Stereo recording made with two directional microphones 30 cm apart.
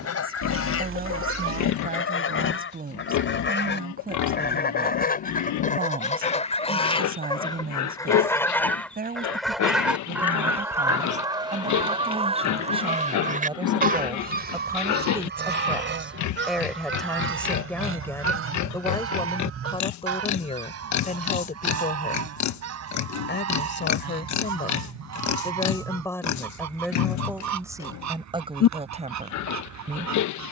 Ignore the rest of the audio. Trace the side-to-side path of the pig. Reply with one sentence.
In this clip you hear the pig stay in one place.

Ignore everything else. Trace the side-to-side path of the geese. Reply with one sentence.
In this clip you hear the geese move from left to right.